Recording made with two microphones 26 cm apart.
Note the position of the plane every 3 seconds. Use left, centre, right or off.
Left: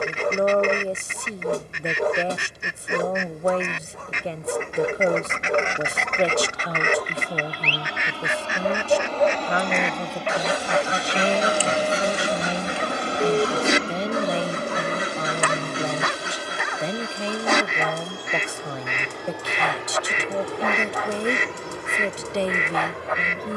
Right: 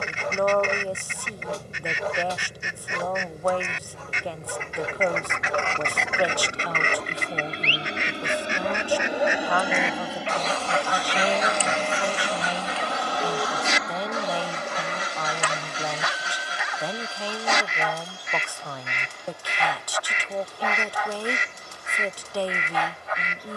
right, right, right, centre, left, left, left, left.